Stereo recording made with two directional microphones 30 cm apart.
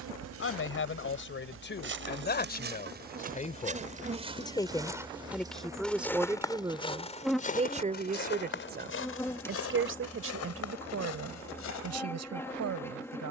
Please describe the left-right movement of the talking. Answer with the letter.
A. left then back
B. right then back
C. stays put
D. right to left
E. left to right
E.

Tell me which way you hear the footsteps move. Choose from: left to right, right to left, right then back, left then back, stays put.
right to left.